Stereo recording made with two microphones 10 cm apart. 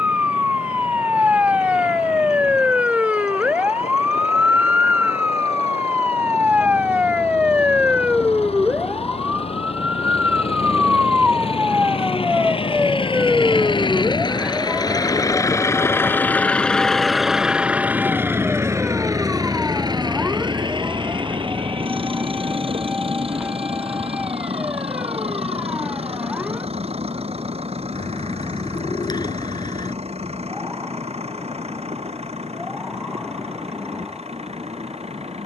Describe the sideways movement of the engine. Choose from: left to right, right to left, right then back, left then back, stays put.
left to right.